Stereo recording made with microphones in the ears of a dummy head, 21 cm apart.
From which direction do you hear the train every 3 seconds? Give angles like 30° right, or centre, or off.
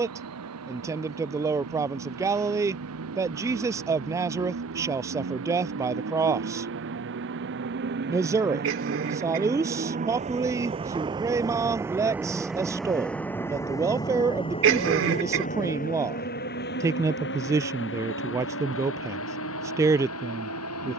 70° right, 60° right, 50° right, 20° right, 10° left, 40° left, 60° left.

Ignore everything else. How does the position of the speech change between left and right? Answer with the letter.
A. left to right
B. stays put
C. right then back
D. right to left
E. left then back
B.